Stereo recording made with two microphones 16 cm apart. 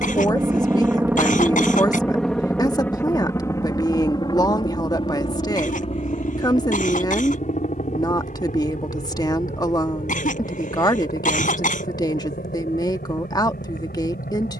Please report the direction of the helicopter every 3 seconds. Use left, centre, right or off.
centre, left, left, left, left.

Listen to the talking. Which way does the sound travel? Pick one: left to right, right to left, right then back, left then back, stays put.
stays put.